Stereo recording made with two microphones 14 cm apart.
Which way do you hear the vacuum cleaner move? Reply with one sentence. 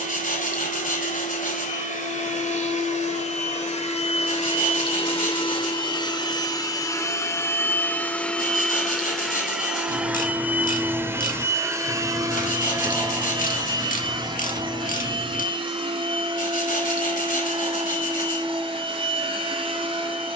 In this clip you hear the vacuum cleaner move from left to right.